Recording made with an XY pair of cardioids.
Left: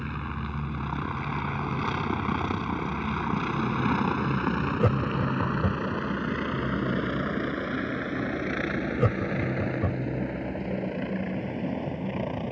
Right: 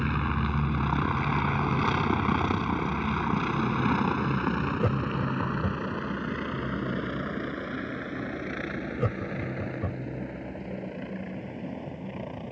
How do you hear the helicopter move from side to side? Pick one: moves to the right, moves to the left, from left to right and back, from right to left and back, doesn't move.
moves to the left.